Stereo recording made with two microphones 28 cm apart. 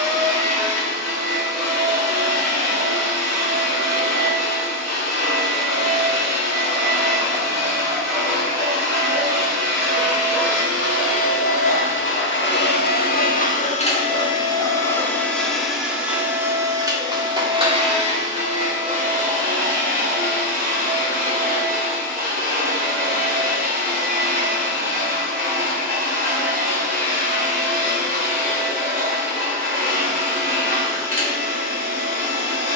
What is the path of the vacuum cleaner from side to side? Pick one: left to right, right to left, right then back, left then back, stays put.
left to right.